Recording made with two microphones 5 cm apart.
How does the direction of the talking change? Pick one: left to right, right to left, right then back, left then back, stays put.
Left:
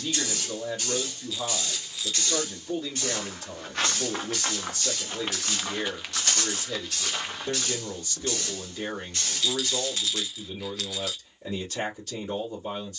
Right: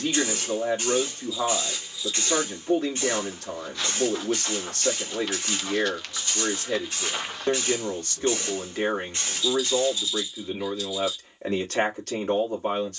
stays put.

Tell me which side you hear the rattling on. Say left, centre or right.
left.